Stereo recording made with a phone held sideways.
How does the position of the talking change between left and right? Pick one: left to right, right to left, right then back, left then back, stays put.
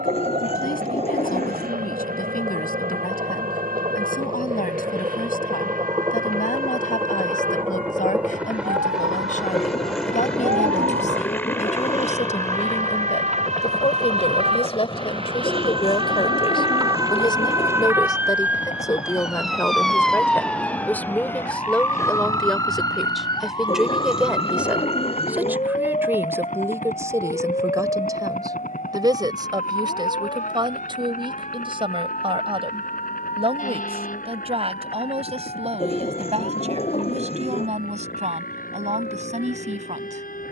left to right.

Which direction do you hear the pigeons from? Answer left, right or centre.
left.